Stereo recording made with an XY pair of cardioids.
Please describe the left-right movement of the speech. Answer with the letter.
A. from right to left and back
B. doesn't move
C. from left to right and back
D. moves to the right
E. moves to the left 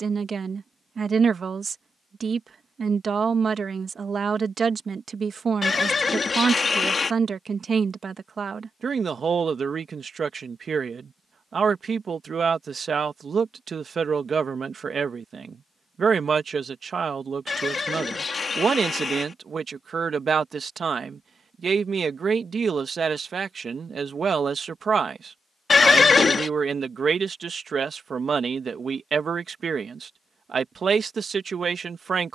B.